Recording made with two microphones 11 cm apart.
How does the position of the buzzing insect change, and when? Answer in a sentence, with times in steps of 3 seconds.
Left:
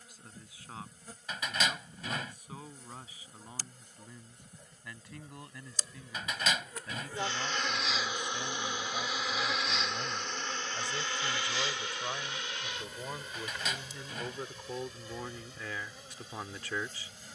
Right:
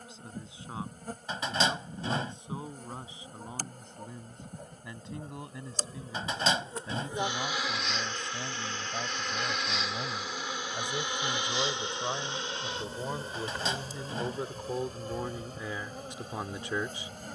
You can hear the buzzing insect on the right from 0 s, in the centre from 6 s and on the right from 12 s.